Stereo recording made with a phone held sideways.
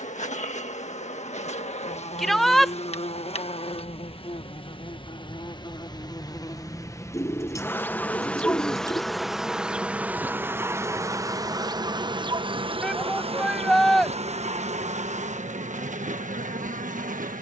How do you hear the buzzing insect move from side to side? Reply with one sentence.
In this clip you hear the buzzing insect move from left to right.